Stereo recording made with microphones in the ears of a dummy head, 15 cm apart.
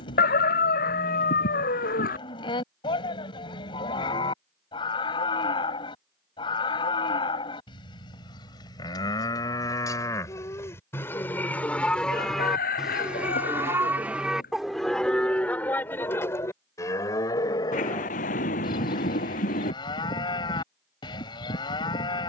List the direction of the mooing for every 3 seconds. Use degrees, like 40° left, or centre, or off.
30° left, 30° left, 30° left, 20° left, centre, 20° left, 30° left, 30° left.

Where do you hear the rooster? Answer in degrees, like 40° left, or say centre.
60° left.